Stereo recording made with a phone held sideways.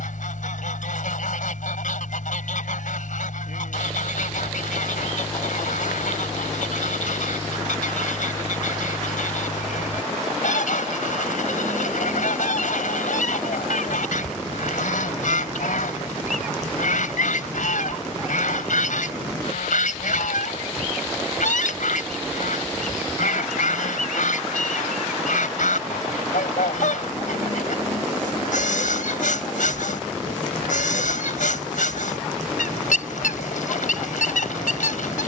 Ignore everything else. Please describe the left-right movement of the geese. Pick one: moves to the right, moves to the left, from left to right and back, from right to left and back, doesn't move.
doesn't move.